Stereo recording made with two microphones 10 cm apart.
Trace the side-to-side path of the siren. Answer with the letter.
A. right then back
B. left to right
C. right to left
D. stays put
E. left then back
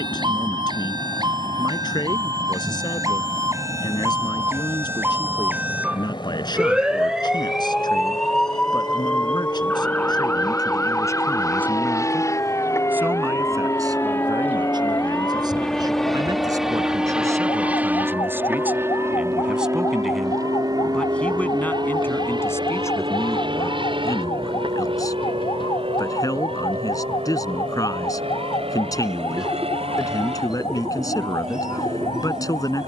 C.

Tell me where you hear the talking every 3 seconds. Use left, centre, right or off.
left, left, left, left, right, right, centre, left, left, left, left.